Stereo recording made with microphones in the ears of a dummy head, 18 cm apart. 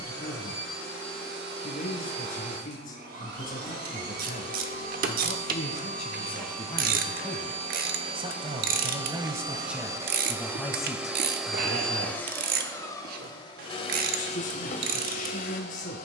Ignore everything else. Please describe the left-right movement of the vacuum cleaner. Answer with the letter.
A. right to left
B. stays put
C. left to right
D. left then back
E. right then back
A.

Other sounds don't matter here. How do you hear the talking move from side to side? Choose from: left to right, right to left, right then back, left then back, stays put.
right then back.